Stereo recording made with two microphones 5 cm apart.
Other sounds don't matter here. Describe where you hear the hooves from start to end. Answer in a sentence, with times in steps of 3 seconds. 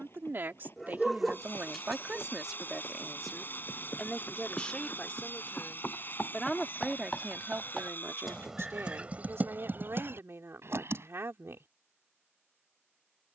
In this clip you hear the hooves on the left from 0 s, in the centre from 6 s, on the right from 9 s and not at all from 12 s.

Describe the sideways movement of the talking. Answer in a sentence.
You can hear the talking go left and come back.